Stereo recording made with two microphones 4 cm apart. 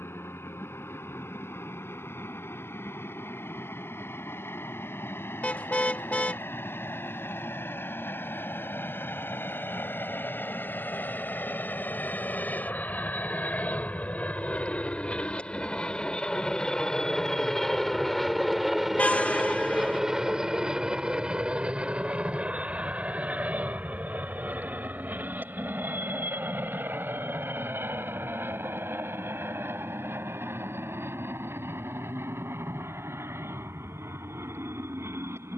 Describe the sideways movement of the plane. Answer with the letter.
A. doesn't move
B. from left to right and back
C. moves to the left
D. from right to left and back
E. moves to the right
E.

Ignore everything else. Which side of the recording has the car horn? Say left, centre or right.
left.